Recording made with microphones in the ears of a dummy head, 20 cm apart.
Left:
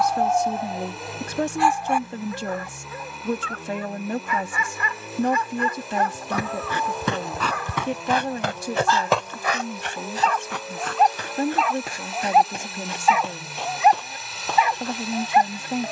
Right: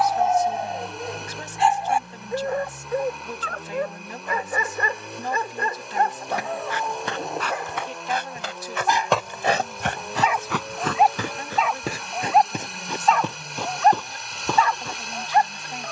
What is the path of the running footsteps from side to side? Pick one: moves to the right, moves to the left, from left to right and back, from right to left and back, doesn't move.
moves to the right.